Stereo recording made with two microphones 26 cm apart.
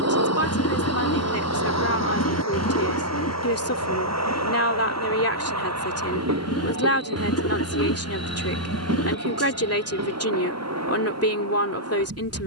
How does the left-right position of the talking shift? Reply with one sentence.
In this clip you hear the talking stay put.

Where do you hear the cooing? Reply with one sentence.
In this clip you hear the cooing on the left.